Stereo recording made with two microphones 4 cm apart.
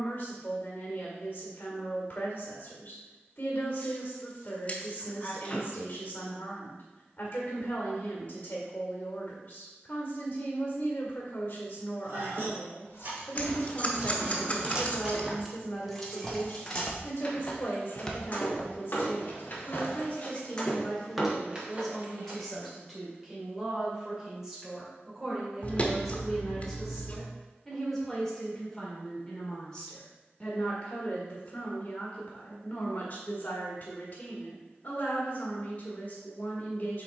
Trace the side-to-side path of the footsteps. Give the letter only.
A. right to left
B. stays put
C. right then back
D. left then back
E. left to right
C.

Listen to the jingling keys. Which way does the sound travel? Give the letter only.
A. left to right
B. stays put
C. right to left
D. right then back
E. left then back
E.